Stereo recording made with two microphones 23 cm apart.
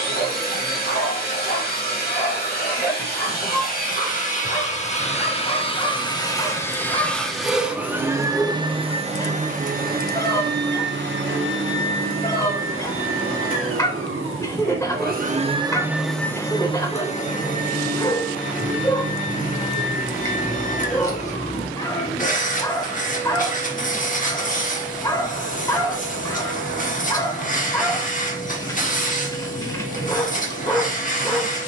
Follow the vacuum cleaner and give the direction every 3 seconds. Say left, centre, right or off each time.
left, left, centre, right, right, centre, left, left, left, left, left.